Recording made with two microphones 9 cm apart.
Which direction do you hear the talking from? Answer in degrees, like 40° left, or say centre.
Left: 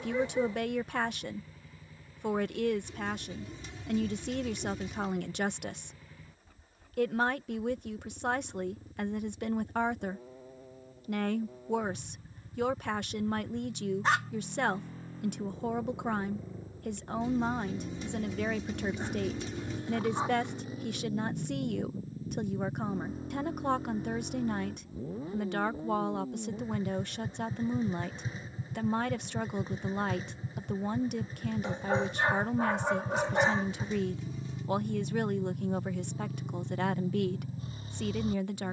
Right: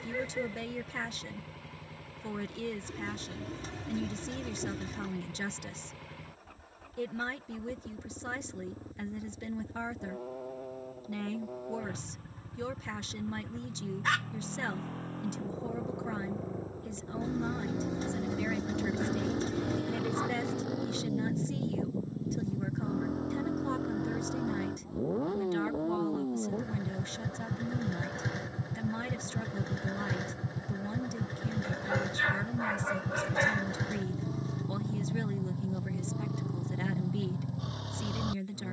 60° left.